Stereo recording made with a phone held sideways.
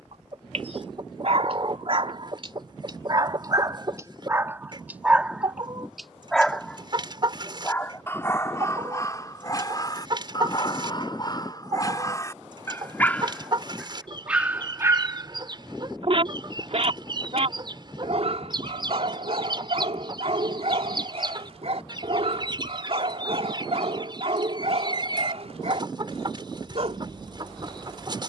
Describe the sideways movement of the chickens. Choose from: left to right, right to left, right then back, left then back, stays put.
stays put.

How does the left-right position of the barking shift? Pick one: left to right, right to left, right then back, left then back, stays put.
left then back.